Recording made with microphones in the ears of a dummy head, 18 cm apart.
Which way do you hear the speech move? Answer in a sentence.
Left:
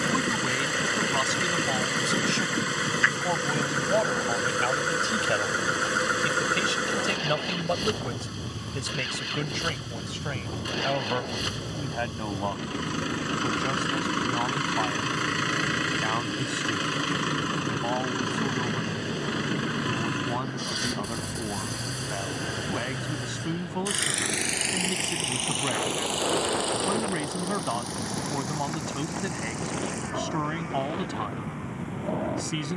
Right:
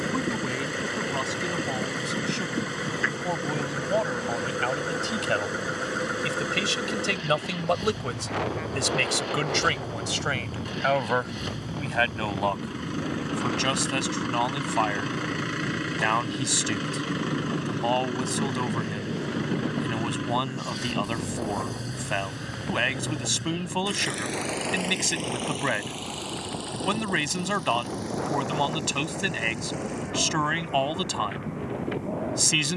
You can hear the speech travel towards the right.